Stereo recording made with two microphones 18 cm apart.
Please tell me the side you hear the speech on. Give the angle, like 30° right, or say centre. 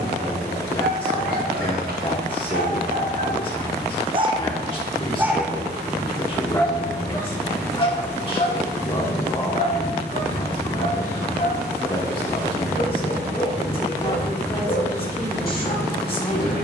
30° left.